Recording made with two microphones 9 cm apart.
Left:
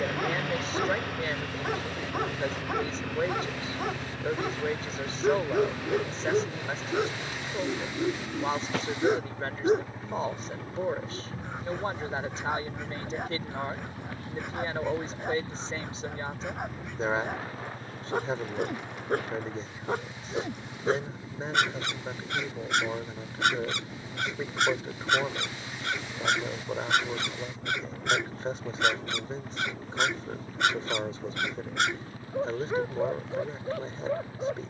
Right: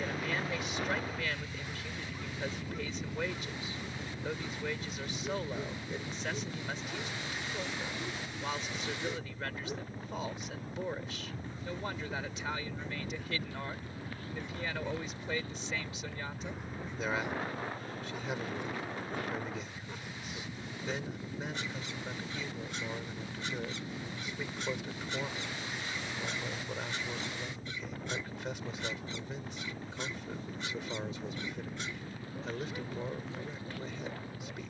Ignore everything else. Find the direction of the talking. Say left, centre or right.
left.